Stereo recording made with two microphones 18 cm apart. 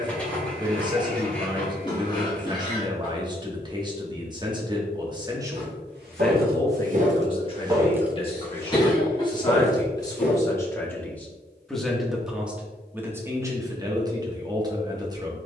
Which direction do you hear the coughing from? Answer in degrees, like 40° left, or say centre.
20° left.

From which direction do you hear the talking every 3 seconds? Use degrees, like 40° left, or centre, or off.
20° right, 20° right, 20° left, 20° left, 20° right.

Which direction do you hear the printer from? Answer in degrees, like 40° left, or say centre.
10° left.